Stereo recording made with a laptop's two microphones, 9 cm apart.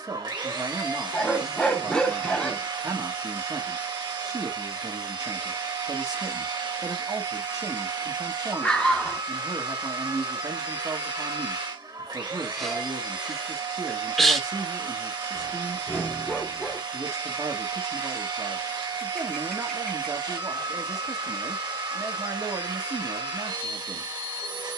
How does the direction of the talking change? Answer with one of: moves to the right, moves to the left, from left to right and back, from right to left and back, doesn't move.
doesn't move.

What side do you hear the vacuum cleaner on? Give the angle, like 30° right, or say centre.
50° right.